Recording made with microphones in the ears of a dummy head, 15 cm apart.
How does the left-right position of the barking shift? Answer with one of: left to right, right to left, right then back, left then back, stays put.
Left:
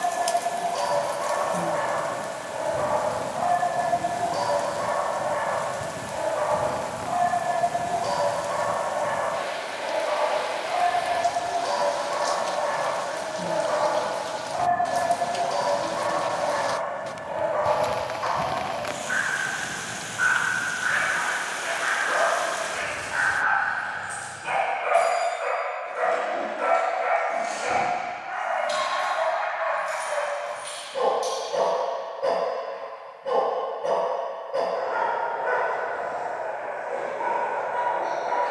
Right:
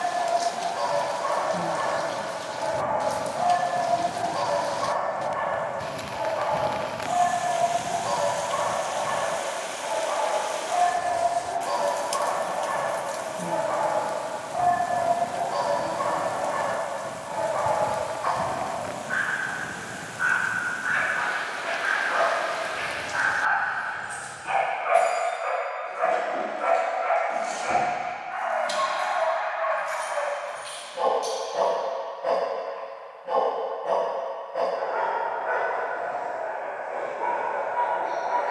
stays put.